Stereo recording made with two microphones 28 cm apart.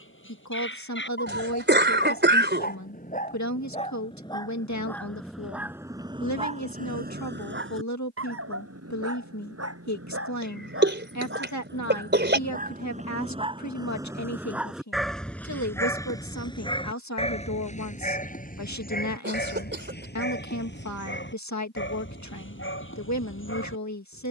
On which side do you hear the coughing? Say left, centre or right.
right.